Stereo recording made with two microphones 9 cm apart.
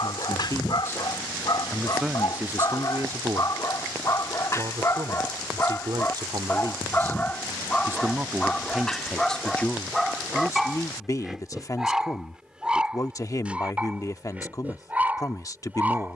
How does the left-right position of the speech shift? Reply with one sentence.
You can hear the speech move from left to right and back again.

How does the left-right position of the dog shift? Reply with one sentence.
You can hear the dog move to the right.